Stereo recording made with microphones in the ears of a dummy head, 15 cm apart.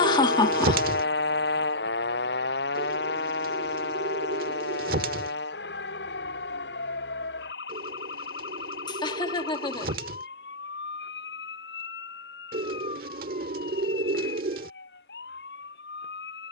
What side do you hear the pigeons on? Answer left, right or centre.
right.